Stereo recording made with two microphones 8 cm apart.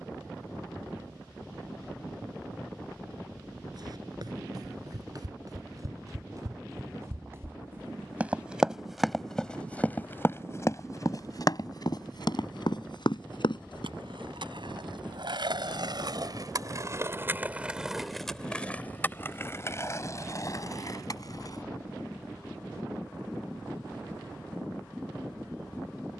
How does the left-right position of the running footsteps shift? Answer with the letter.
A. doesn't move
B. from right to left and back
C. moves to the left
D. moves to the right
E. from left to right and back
C.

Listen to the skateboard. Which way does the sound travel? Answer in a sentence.
In this clip you hear the skateboard travel towards the left.